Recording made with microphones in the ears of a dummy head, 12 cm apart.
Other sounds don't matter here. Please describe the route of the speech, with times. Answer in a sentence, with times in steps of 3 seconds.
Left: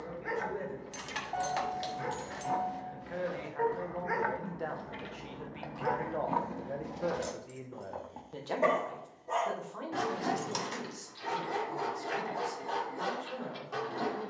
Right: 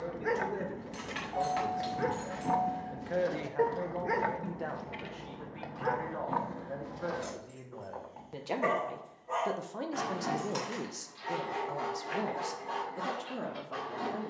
In this clip you hear the speech on the right from 0 s, in the centre from 3 s and on the right from 9 s.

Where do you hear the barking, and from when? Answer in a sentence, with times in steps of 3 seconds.
In this clip you hear the barking on the right from 0 s and on the left from 6 s.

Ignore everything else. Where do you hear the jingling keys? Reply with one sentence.
In this clip you hear the jingling keys on the left.